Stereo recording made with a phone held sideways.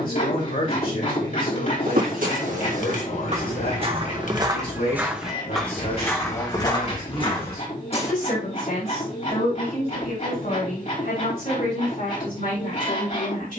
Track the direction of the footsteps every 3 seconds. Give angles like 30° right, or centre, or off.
60° right, 20° right, 30° left, off, off.